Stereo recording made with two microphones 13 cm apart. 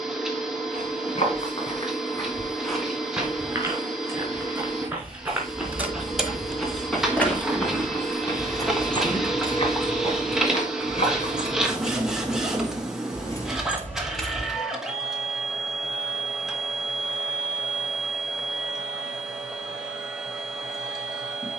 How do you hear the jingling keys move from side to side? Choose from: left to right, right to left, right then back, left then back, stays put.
left then back.